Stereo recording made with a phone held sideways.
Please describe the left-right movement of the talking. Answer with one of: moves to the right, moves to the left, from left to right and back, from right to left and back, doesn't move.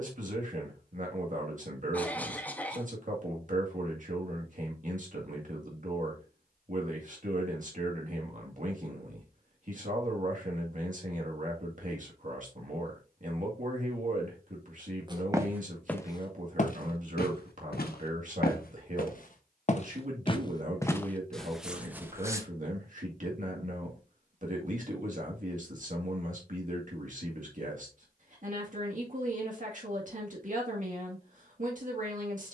doesn't move.